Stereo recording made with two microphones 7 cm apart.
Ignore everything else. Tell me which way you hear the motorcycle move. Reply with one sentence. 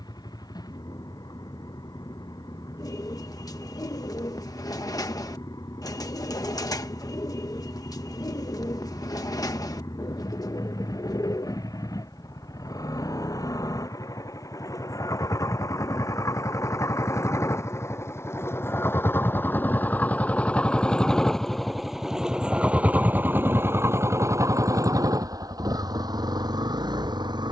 In this clip you hear the motorcycle travel towards the right.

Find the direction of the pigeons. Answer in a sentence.
In this clip you hear the pigeons on the left.